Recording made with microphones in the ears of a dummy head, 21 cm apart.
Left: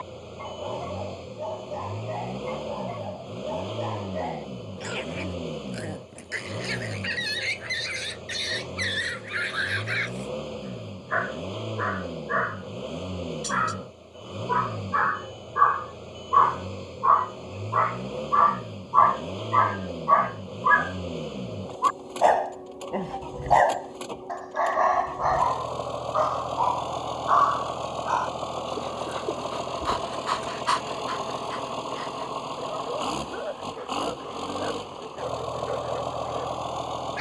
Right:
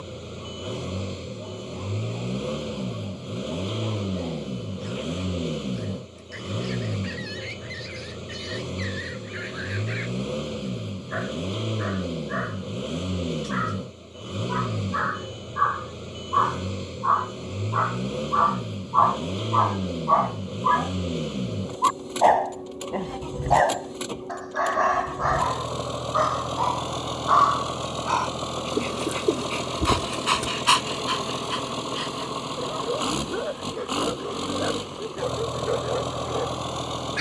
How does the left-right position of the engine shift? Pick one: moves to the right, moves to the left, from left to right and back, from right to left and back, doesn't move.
doesn't move.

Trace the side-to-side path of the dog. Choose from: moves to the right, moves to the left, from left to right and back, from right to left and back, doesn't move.
moves to the right.